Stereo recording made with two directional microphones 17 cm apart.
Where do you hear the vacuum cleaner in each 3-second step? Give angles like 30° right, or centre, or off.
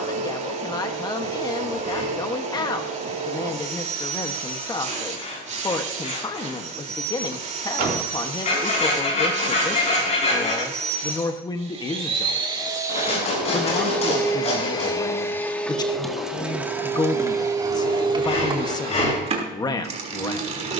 40° right, 40° right, 40° right, 40° right, centre, 10° right, 30° right.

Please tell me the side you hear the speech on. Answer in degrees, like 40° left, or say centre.
20° left.